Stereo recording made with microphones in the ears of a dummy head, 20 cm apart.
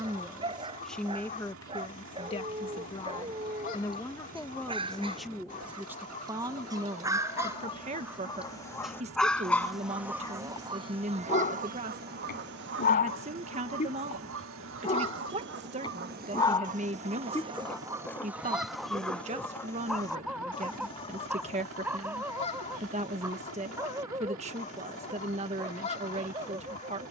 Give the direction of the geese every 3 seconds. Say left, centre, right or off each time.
left, left, left, right, right, right, centre, left, left.